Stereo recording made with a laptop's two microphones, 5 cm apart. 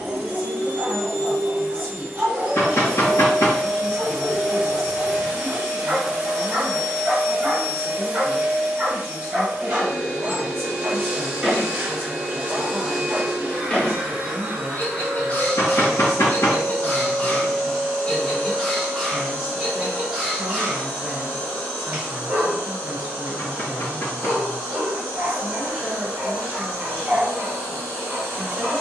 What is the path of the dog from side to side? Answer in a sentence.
You can hear the dog go left and come back.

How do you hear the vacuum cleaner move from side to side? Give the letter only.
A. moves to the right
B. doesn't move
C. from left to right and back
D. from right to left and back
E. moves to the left
E.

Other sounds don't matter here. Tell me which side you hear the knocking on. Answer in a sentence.
You can hear the knocking on the left.